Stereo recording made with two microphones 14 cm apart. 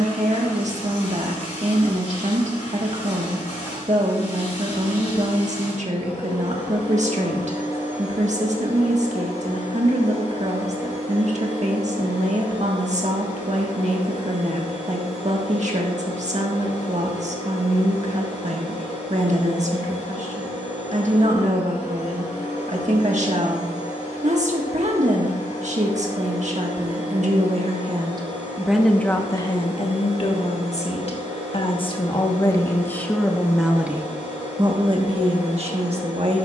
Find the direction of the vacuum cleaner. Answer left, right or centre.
left.